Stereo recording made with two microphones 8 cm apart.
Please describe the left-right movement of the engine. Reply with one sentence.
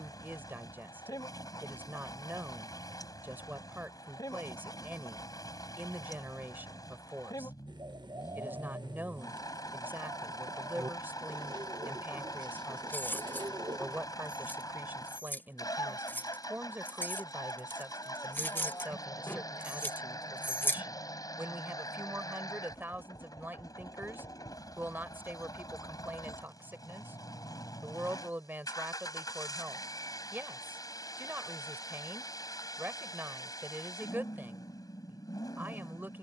In this clip you hear the engine stay put.